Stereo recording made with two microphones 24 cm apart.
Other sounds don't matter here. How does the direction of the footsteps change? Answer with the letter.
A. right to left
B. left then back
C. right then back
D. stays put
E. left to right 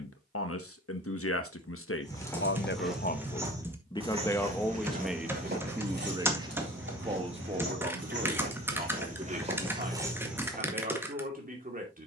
C.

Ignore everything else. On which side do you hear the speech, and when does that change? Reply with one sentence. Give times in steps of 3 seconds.
You can hear the speech on the left from 0 s, in the centre from 3 s and on the right from 6 s.